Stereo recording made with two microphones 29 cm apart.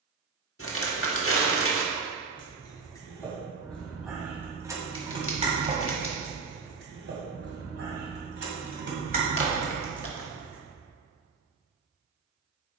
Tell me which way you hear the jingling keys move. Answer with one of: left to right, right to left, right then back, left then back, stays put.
right then back.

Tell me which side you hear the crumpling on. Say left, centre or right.
left.